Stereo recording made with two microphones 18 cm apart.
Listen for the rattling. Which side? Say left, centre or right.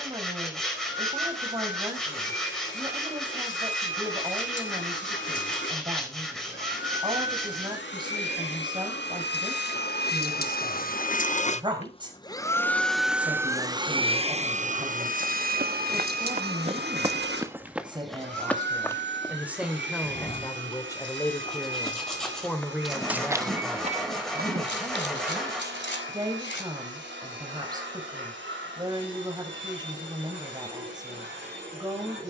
left.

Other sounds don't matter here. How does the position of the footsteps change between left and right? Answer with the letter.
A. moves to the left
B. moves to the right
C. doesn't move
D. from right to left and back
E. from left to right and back
D.